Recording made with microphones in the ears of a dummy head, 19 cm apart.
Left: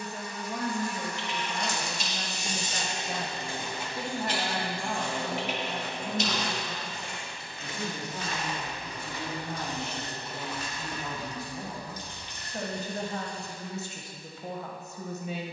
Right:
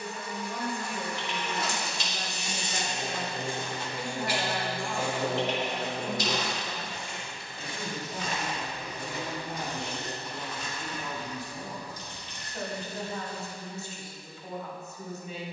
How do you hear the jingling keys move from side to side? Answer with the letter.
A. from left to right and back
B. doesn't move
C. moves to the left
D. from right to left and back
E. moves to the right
C.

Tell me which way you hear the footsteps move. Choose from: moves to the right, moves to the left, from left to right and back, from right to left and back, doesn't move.
from left to right and back.